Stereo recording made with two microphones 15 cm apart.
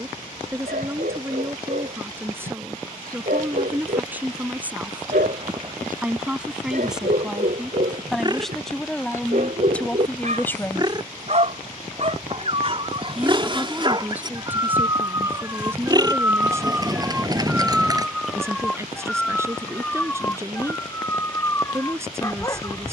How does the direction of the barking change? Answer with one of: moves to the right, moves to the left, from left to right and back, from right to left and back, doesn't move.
moves to the left.